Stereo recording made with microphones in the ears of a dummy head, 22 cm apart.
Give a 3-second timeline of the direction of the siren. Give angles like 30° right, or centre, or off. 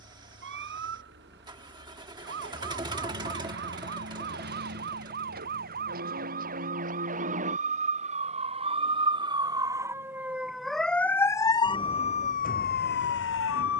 50° right, 40° right, 30° right, centre, 40° left.